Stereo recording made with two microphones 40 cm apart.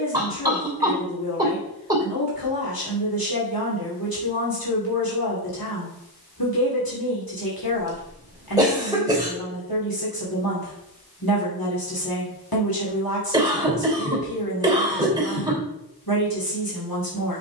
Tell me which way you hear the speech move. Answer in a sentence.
You can hear the speech stay in one place.